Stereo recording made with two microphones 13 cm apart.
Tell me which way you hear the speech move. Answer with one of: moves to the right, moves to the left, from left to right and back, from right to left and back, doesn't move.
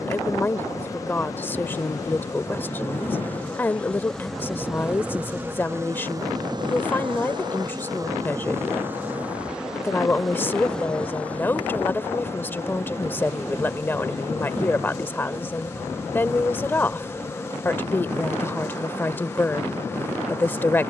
doesn't move.